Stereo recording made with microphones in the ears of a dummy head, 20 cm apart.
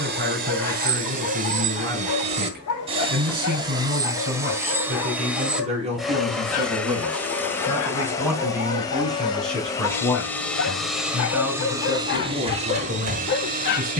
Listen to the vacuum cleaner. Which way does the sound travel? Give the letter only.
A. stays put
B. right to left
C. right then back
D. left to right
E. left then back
E.